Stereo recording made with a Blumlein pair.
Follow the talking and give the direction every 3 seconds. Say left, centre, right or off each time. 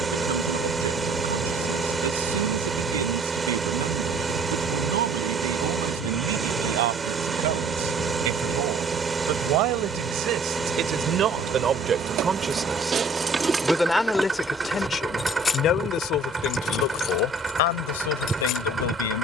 right, right, right, right, centre, left, left.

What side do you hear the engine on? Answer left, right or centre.
centre.